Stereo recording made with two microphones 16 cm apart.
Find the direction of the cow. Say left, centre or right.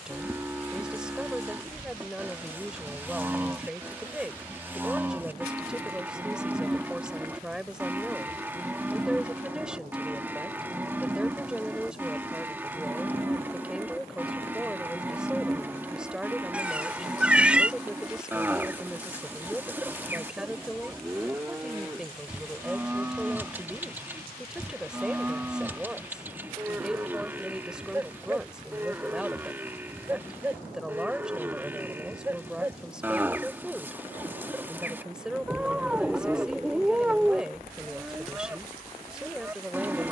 centre.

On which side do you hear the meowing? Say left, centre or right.
centre.